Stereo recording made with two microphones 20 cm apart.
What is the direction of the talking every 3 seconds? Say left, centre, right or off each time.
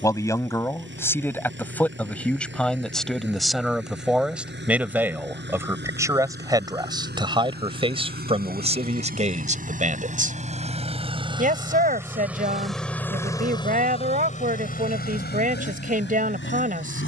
centre, centre, right, right, right, right.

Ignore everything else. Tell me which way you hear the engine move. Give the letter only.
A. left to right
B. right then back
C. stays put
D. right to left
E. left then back
D.